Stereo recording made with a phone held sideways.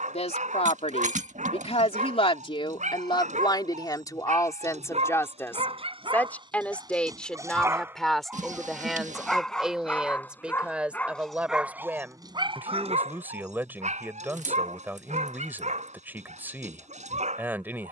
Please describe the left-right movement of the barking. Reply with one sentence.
In this clip you hear the barking go left and come back.